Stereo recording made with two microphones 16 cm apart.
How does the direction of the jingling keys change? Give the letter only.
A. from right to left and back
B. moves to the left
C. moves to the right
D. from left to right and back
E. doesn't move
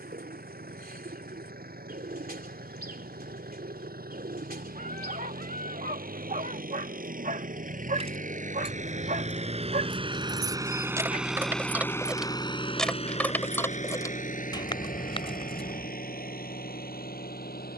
B.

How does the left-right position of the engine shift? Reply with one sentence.
You can hear the engine move to the left.